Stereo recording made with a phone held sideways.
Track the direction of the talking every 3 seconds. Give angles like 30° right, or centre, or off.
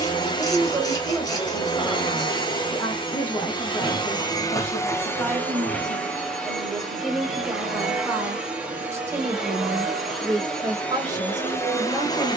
10° right, 10° left, 10° right, 20° right.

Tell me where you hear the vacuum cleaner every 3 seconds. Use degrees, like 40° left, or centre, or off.
30° left, 20° left, centre, 10° left.